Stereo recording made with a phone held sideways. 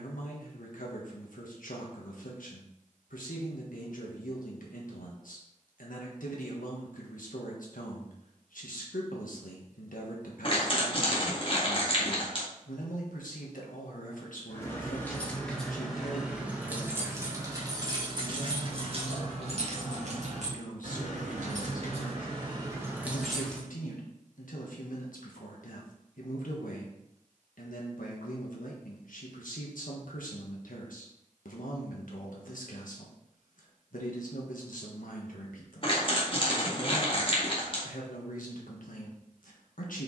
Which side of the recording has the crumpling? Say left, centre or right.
left.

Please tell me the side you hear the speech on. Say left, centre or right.
left.